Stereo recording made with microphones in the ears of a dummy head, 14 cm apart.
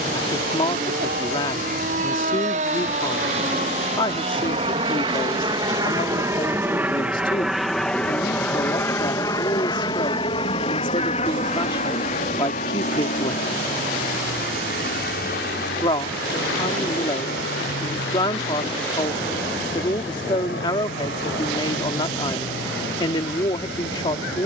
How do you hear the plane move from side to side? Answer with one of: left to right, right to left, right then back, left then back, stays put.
right to left.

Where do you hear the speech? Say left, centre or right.
left.